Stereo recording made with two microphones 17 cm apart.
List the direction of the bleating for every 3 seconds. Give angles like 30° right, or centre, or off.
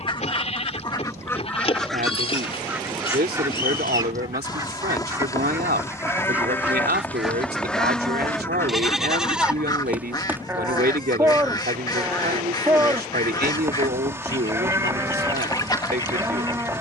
40° left, 30° left, 10° left, 10° right, 20° right, 20° right.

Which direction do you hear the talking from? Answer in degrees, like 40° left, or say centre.
80° right.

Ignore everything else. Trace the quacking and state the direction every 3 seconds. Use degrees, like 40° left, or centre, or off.
10° left, 20° right, centre, 20° left, 20° left, 20° left.